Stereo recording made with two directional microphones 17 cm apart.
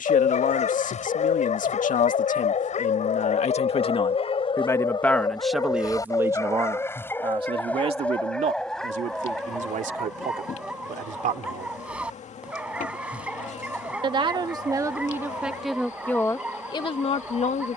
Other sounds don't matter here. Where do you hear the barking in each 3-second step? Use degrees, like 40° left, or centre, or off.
40° left, 30° left, 10° left, centre, 10° right, 10° right.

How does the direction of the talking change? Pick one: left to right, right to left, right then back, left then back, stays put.
right then back.